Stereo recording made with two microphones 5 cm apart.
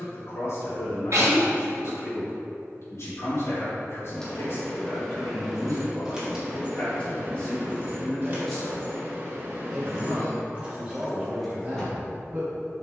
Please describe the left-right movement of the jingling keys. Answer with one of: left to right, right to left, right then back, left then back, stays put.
right then back.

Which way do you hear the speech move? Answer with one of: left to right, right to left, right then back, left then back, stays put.
left to right.